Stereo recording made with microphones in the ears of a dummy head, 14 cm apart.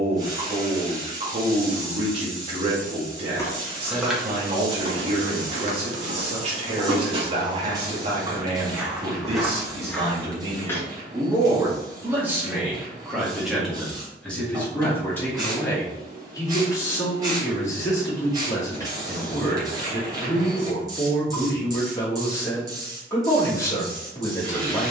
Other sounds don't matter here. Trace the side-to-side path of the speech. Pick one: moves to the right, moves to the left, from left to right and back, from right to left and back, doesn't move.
moves to the left.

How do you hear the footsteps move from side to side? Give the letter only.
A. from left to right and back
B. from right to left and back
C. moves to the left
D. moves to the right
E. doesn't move
A.